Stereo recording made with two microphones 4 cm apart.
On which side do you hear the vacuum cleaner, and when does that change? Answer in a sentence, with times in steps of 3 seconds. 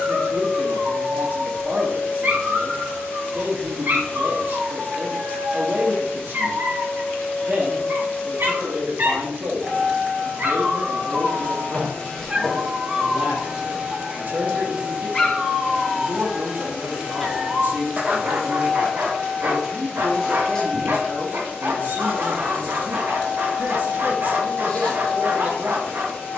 In this clip you hear the vacuum cleaner on the left from 0 s, in the centre from 12 s and on the left from 21 s.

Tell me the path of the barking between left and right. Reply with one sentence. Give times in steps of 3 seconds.
You can hear the barking on the right from 0 s, in the centre from 12 s and on the right from 18 s.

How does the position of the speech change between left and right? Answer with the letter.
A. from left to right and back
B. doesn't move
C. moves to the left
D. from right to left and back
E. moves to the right
B.